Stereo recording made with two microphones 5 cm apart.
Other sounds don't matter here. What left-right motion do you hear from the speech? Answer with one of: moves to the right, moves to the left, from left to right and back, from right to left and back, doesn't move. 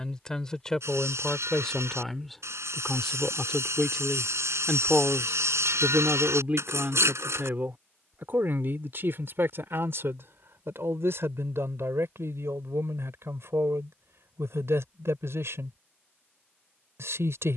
moves to the right.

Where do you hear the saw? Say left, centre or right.
right.